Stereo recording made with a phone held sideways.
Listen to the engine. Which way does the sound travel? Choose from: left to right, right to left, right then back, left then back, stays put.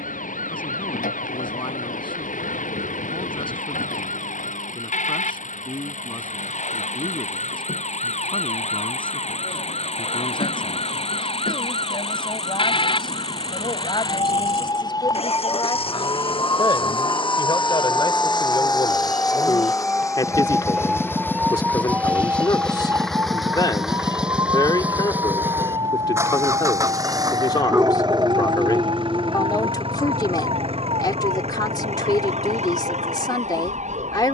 left to right.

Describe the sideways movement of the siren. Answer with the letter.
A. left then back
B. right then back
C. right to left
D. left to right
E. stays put
D.